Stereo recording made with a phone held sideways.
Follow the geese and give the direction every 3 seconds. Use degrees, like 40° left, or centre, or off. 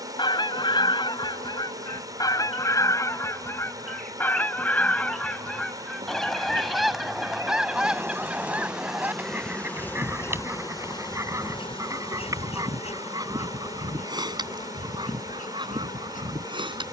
30° left, 10° left, centre, 20° right, 30° right, 30° right.